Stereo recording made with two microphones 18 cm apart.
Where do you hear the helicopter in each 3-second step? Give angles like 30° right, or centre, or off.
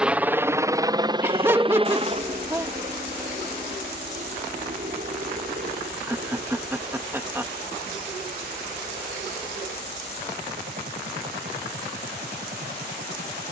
20° right, 40° right, 50° right, 50° right, 50° right.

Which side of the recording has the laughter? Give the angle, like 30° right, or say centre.
10° right.